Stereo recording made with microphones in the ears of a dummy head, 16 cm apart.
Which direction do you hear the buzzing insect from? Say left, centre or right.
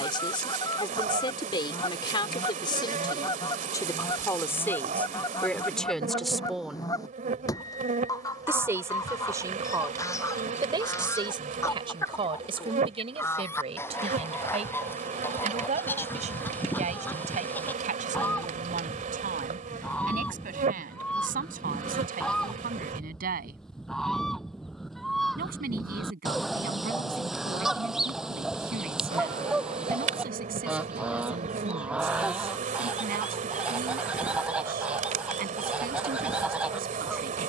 right.